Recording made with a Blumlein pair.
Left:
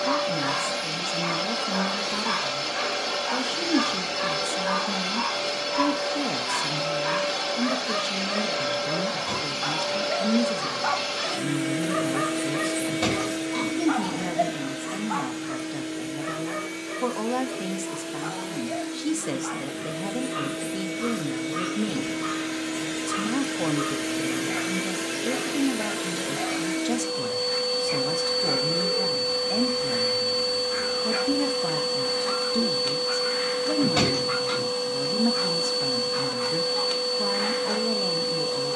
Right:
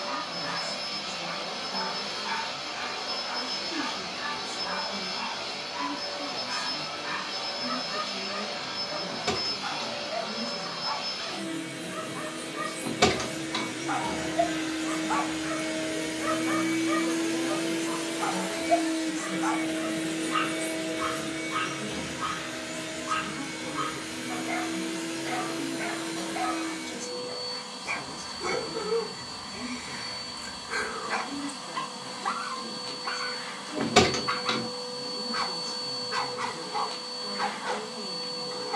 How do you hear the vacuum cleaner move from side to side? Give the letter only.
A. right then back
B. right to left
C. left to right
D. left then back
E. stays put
A.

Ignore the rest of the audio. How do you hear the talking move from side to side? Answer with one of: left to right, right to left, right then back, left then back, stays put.
stays put.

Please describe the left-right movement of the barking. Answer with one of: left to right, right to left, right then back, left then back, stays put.
left to right.